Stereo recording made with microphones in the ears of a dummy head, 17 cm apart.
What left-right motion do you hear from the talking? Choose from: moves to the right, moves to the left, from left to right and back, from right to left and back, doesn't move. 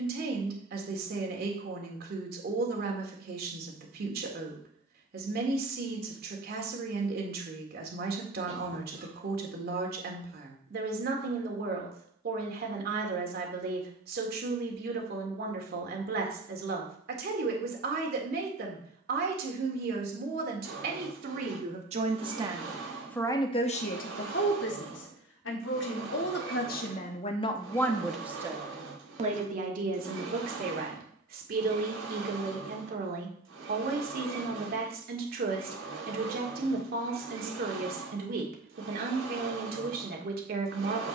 from right to left and back.